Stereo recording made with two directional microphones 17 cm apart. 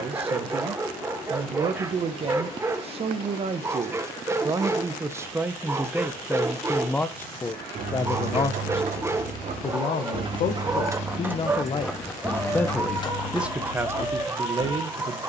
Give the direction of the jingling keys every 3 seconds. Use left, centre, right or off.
off, off, right, right, left.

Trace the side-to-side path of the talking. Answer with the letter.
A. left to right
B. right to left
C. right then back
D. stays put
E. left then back
E.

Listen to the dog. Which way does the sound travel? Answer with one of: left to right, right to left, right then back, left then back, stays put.
stays put.